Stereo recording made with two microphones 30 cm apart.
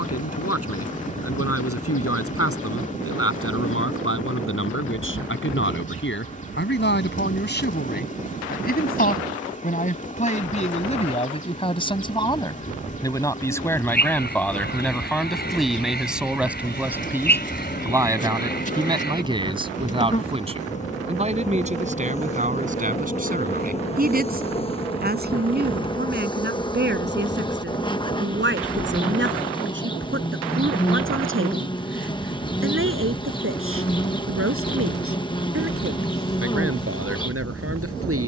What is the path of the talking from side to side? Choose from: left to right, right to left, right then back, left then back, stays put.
left to right.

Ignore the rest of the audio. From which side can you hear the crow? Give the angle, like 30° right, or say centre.
30° left.